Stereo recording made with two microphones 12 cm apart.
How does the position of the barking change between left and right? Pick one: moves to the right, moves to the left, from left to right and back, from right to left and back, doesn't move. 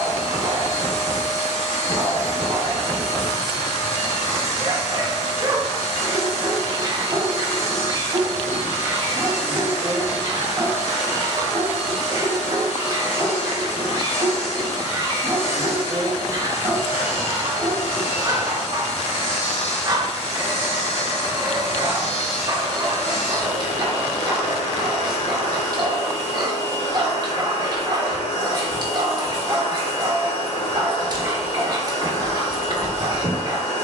doesn't move.